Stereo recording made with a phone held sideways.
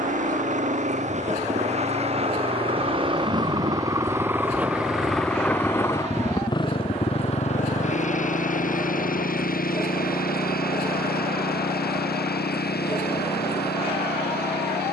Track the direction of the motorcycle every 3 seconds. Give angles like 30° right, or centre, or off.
50° right, 10° right, 40° left, 70° left, 80° left.